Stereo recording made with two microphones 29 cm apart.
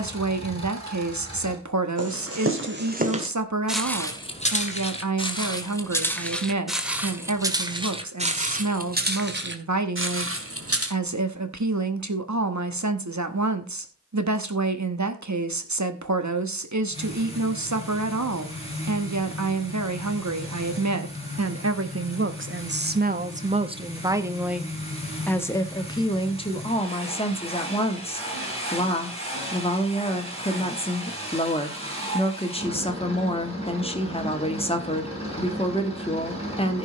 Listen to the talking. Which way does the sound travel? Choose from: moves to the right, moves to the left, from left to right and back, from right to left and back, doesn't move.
moves to the left.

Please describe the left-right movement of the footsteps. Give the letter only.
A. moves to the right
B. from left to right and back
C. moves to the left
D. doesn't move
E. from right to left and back
E.